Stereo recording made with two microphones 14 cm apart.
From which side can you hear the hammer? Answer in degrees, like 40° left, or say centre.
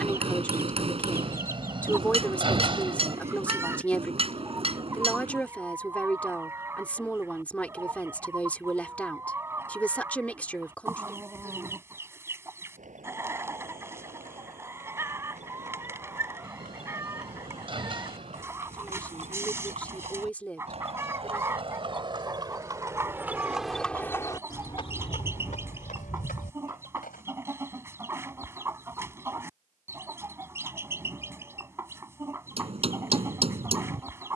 40° right.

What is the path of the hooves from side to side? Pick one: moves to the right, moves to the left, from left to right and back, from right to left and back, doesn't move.
moves to the left.